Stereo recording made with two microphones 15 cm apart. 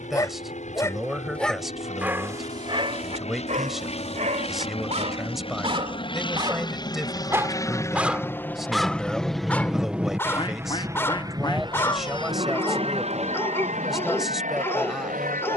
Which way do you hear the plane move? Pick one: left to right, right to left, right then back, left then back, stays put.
left to right.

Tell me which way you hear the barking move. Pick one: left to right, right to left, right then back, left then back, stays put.
right then back.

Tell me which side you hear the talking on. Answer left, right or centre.
centre.